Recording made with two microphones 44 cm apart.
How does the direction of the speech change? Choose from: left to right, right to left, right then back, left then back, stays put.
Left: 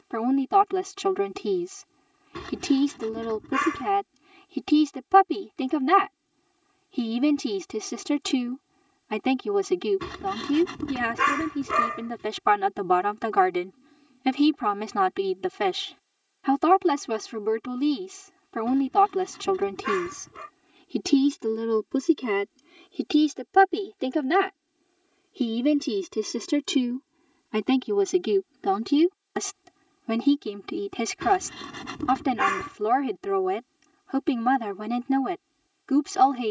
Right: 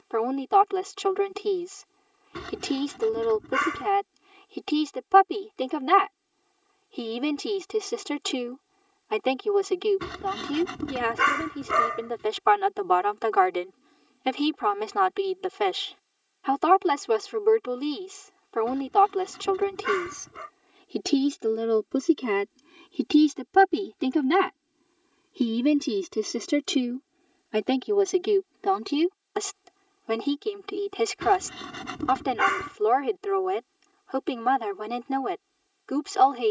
right then back.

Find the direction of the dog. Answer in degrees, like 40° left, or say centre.
centre.